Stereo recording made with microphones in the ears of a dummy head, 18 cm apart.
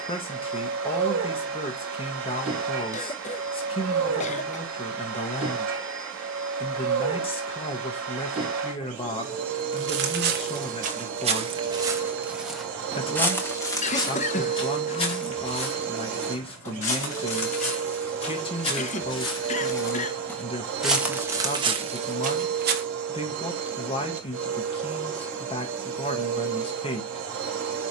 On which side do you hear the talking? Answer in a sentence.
In this clip you hear the talking on the left.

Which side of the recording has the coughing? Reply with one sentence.
In this clip you hear the coughing on the left.